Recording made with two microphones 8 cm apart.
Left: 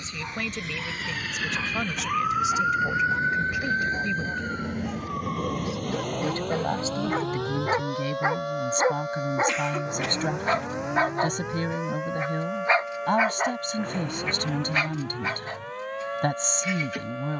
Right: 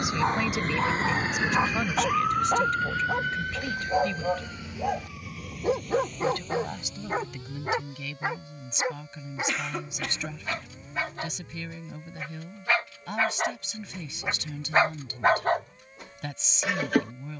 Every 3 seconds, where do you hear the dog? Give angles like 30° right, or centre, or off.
70° right, 60° right, centre, 40° left, centre, 60° right.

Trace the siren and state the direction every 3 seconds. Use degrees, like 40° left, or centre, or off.
20° right, 40° left, 60° left, 70° left, 70° left, 80° left.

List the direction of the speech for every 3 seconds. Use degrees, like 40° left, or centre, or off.
centre, 10° left, 40° left, 50° left, 50° left, 50° left.